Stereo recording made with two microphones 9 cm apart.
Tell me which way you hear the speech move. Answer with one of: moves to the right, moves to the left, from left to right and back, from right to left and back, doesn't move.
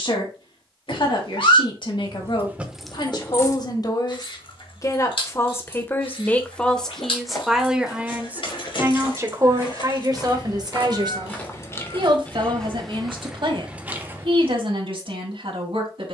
moves to the right.